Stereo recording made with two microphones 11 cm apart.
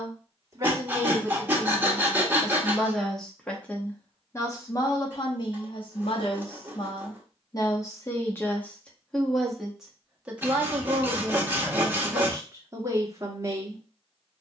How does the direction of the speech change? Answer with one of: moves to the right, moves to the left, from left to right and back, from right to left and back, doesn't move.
from right to left and back.